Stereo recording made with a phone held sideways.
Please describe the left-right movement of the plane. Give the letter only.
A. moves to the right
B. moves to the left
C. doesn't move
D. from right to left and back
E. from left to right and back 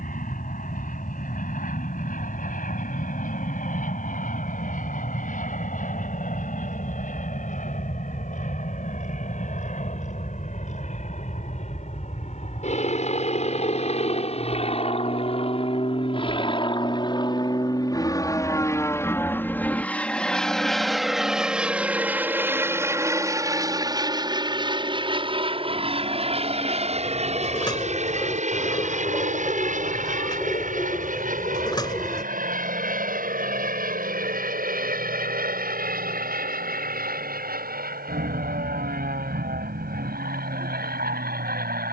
A.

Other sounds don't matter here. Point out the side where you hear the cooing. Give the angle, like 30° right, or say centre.
30° left.